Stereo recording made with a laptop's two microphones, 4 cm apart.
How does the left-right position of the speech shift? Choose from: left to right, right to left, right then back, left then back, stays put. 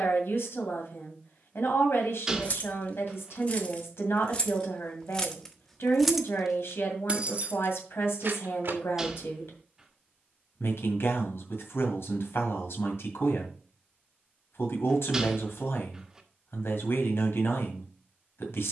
stays put.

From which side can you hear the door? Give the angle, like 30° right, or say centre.
10° right.